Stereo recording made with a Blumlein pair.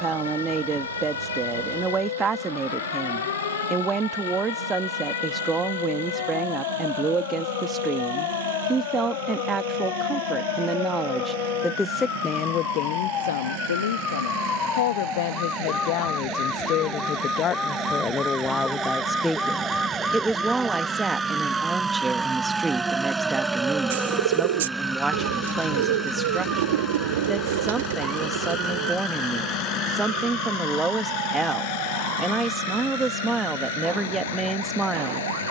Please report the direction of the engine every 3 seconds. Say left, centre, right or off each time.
right, right, right, right, right, right, right, centre, centre, left, left, left.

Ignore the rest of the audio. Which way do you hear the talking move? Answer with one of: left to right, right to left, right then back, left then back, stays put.
left then back.